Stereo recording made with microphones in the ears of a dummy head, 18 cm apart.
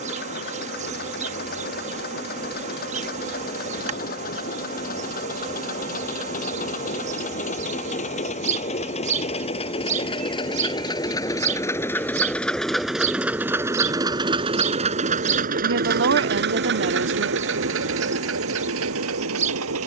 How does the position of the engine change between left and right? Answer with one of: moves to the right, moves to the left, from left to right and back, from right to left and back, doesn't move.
moves to the right.